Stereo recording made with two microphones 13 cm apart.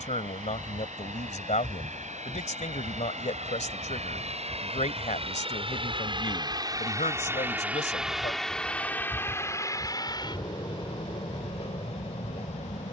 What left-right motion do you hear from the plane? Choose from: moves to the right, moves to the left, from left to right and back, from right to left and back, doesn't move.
moves to the left.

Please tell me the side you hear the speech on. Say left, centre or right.
left.